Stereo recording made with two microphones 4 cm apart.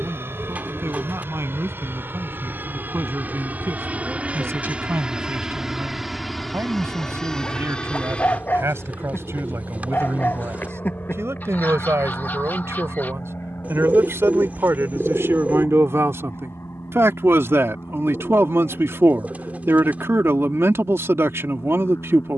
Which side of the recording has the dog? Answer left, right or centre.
left.